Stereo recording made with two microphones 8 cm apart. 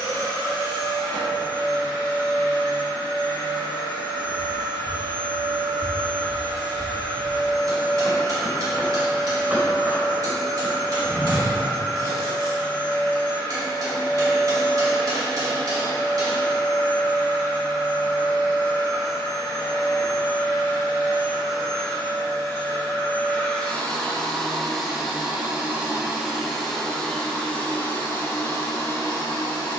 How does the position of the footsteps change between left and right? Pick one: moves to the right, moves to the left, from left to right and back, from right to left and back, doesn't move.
moves to the right.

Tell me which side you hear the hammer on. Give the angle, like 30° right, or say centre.
50° right.